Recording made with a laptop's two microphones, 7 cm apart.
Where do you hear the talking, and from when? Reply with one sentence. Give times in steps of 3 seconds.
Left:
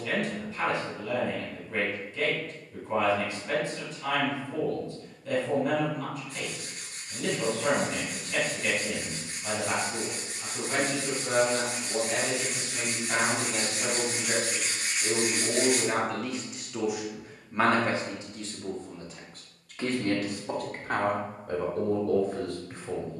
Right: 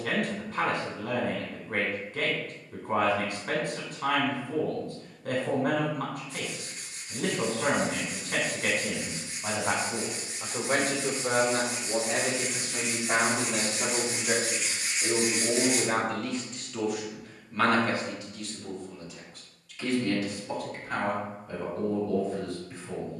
In this clip you hear the talking on the right from 0 s, in the centre from 15 s and on the left from 18 s.